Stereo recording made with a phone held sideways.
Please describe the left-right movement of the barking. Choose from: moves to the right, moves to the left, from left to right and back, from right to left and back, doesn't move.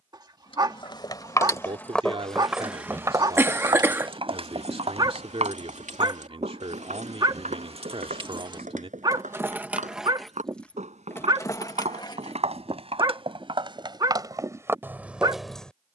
doesn't move.